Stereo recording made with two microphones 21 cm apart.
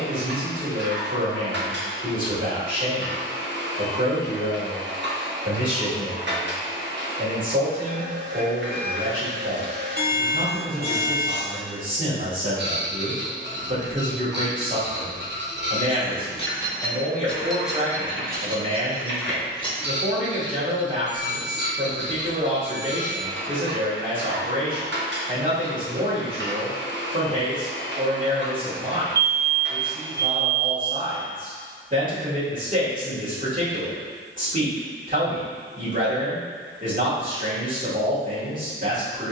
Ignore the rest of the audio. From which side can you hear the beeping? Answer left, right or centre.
right.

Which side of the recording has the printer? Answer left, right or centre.
right.